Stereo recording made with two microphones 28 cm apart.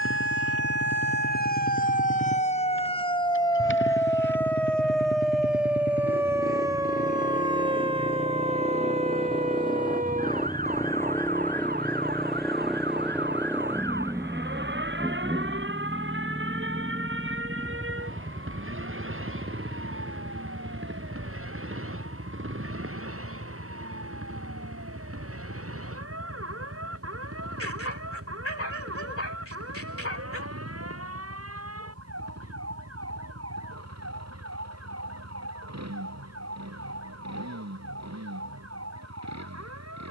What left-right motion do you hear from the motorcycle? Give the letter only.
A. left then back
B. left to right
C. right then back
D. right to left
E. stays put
B.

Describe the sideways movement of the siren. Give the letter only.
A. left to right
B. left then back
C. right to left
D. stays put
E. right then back
A.